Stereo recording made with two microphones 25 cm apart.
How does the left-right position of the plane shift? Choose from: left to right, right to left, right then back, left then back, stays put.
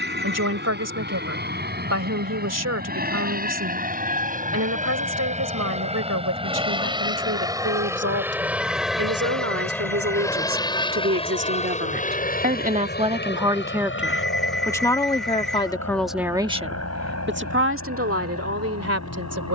right to left.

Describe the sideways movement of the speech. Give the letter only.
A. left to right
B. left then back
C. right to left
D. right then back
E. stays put
B.